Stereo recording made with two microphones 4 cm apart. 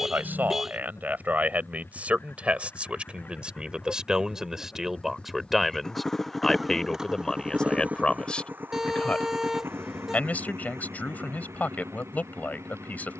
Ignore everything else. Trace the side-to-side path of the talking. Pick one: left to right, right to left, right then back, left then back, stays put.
right to left.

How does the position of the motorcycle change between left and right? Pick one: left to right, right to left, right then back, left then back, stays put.
left to right.